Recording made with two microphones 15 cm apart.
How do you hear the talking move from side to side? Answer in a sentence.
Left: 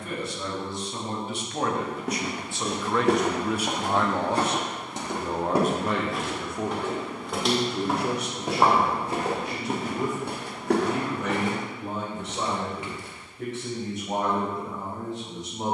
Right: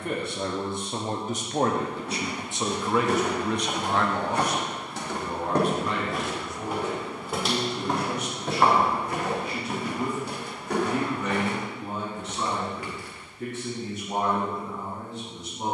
You can hear the talking travel towards the left.